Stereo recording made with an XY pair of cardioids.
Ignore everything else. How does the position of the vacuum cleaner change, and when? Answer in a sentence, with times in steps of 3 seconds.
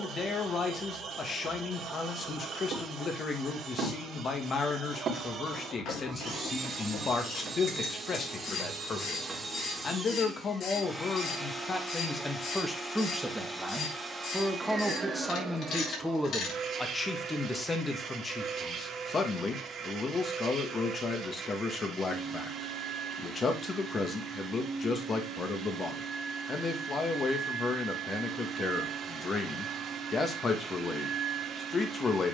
In this clip you hear the vacuum cleaner on the right from 0 s, in the centre from 9 s and on the right from 15 s.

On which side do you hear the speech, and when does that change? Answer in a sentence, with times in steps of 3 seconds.
In this clip you hear the speech on the left from 0 s, in the centre from 12 s and on the left from 18 s.